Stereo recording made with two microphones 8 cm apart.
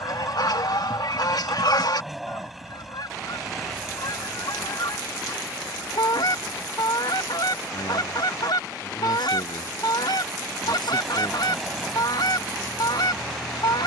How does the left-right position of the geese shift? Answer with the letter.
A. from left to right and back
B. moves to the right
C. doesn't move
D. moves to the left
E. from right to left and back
C.